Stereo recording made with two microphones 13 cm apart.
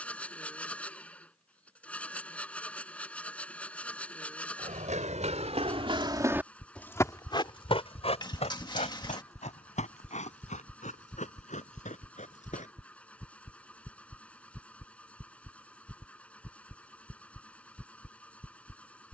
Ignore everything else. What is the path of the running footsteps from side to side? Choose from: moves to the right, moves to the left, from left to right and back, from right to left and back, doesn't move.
moves to the left.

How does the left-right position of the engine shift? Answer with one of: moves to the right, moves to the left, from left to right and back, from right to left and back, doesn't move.
doesn't move.